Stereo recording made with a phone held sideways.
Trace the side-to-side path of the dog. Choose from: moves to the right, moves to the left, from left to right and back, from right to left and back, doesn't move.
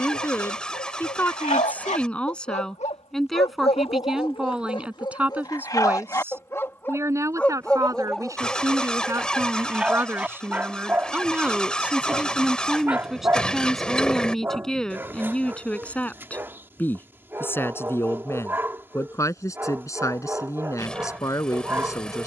moves to the right.